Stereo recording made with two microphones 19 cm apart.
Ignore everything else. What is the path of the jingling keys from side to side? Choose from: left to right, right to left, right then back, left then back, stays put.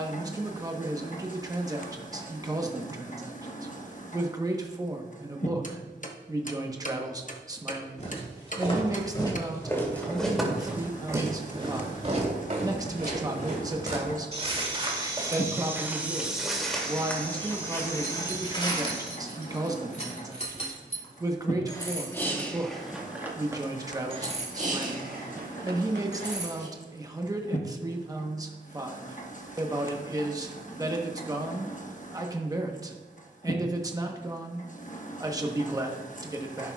left to right.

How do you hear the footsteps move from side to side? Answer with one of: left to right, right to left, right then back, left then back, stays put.
right then back.